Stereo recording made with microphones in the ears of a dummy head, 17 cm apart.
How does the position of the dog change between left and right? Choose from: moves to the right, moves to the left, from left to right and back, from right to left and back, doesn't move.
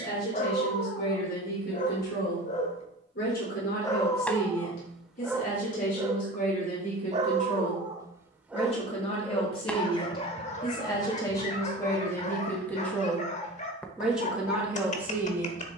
from left to right and back.